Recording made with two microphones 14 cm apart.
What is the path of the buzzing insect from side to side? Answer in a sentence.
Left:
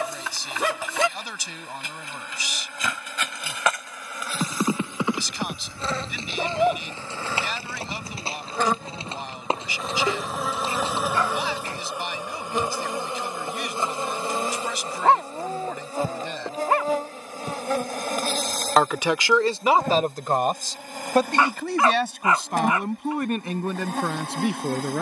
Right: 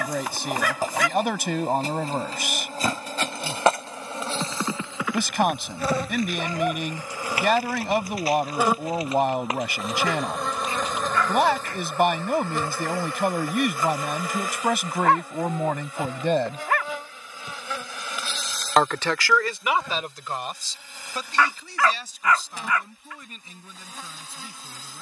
In this clip you hear the buzzing insect move to the left.